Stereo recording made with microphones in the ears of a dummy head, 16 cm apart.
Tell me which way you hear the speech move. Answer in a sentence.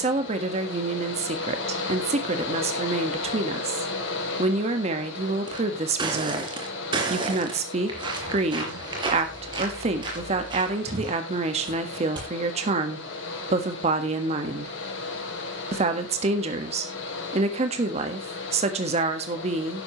You can hear the speech stay put.